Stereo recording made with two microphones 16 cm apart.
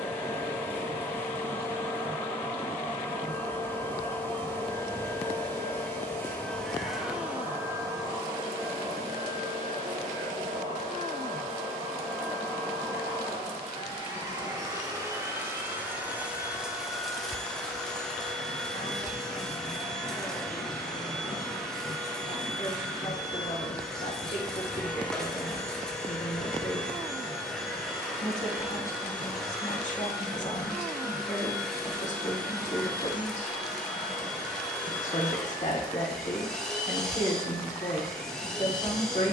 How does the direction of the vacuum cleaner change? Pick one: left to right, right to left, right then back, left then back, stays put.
right then back.